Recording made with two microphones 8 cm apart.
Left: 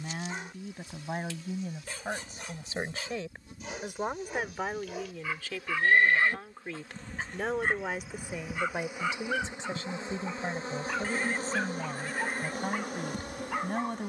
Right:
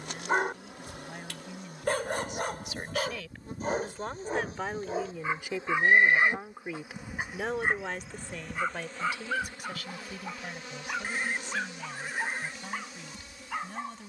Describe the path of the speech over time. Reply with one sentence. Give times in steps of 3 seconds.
In this clip you hear the speech on the left from 0 s, in the centre from 3 s and on the left from 9 s.